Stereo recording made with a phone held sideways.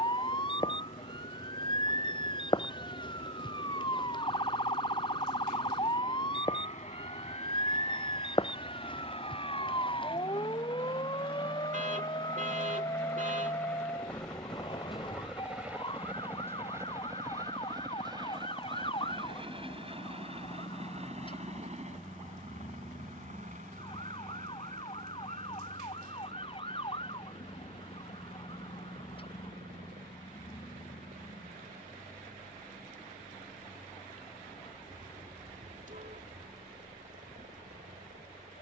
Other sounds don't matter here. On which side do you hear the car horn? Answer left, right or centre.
right.